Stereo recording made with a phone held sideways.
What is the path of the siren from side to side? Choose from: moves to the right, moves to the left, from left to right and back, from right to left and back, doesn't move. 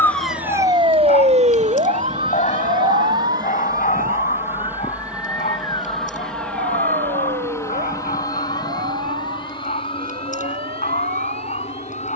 moves to the right.